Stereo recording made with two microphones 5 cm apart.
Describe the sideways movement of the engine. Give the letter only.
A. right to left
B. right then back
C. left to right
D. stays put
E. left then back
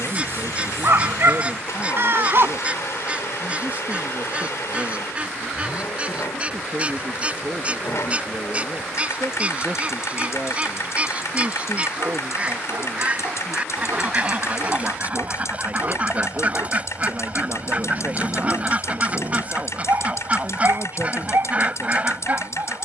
D.